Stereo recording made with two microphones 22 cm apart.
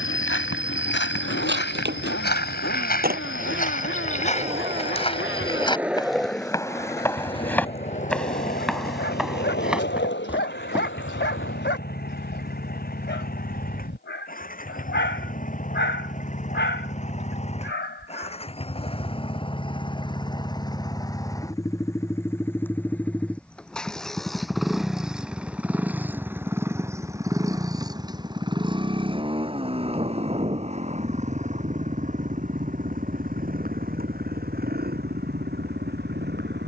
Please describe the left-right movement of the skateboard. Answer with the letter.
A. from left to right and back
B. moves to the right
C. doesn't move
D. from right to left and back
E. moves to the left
E.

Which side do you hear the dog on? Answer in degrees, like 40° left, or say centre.
60° left.